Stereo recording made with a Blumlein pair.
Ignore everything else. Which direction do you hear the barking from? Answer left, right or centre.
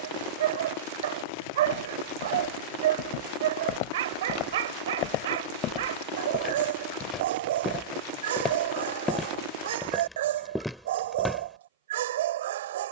right.